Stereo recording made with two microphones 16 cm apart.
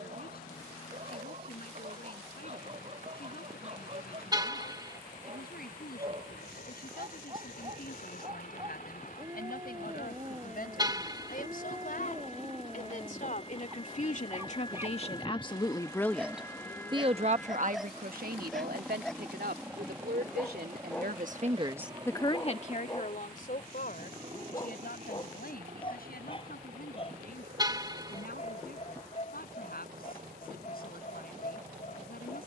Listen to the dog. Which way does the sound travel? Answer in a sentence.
In this clip you hear the dog travel towards the left.